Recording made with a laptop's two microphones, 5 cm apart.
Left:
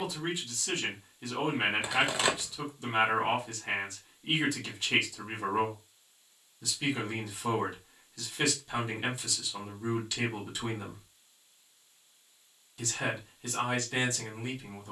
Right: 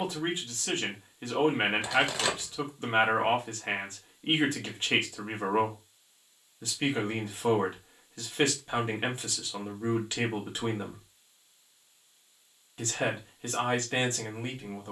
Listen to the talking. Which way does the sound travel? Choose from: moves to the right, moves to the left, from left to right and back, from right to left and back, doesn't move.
doesn't move.